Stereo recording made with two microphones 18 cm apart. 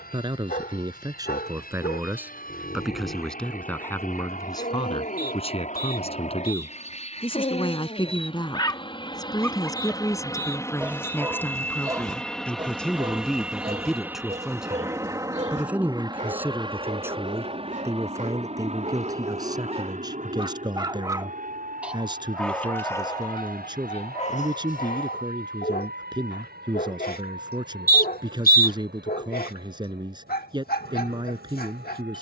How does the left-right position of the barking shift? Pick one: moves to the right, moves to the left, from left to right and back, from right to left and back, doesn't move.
from left to right and back.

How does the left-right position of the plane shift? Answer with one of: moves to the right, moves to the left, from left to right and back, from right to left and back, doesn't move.
moves to the right.